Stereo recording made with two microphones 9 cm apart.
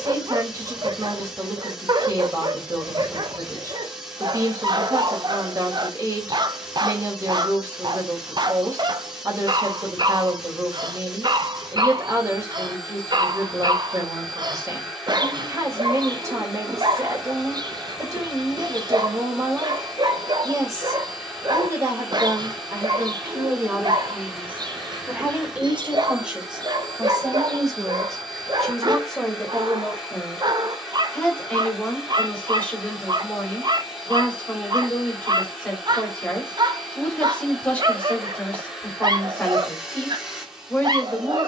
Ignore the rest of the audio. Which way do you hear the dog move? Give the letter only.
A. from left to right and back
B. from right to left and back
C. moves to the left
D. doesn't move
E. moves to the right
D.